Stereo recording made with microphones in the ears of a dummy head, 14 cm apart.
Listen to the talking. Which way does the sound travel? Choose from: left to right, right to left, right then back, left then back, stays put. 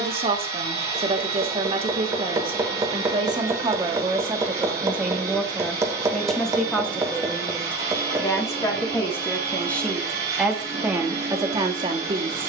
left then back.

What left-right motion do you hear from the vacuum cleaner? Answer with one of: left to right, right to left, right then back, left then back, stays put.
stays put.